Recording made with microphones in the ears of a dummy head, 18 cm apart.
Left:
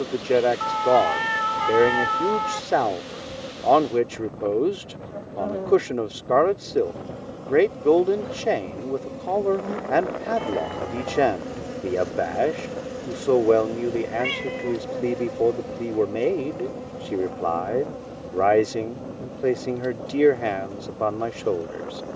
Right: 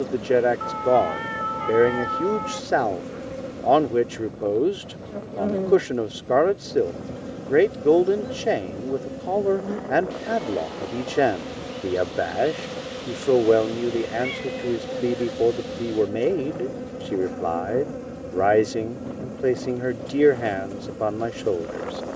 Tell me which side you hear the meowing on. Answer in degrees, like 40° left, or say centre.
60° left.